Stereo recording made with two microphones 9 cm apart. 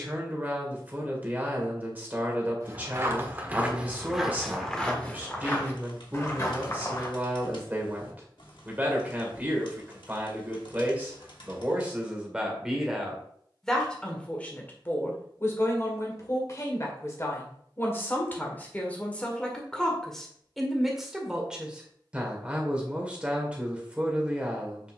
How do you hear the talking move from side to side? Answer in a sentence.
In this clip you hear the talking go left and come back.